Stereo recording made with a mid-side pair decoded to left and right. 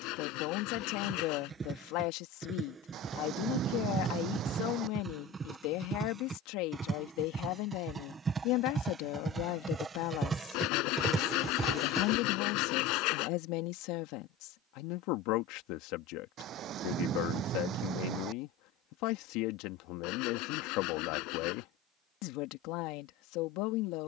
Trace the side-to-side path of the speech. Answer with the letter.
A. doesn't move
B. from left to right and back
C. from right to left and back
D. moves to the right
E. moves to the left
A.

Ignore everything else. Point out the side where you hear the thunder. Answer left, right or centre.
right.